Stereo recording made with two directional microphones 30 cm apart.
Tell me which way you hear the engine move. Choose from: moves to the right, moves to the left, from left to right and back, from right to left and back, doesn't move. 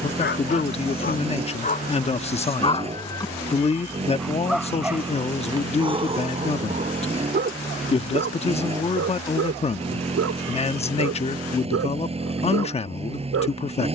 doesn't move.